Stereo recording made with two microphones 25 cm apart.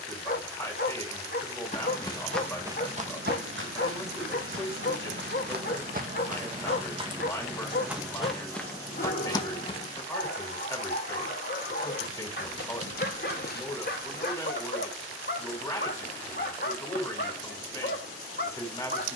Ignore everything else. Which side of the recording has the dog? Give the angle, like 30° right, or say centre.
40° left.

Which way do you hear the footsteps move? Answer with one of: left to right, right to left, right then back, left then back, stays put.
right then back.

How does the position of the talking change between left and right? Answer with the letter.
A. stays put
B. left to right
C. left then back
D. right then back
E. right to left
A.